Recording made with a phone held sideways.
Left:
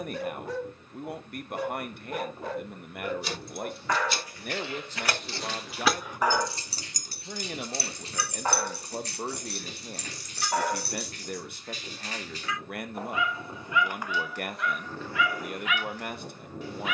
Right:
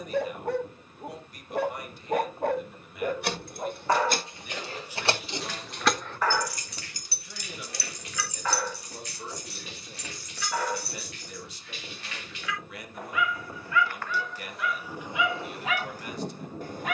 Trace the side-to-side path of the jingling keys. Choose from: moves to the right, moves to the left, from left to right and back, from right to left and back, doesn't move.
moves to the left.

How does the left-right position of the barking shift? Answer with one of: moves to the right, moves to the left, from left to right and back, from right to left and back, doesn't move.
from right to left and back.